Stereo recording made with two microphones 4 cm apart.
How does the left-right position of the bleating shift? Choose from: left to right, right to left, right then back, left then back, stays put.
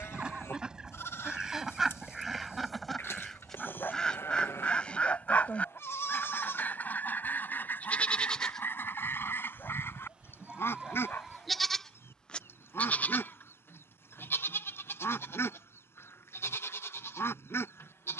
right then back.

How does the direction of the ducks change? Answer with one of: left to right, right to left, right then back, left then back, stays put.
right to left.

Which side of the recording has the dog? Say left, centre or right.
left.